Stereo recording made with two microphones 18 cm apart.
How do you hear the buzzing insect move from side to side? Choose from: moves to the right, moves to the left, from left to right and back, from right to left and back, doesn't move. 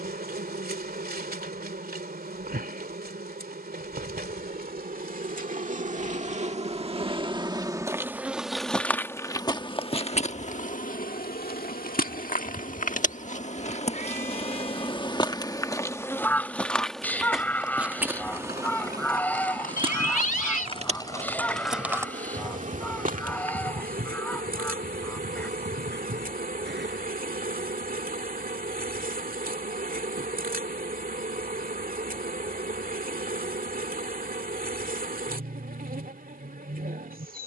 from right to left and back.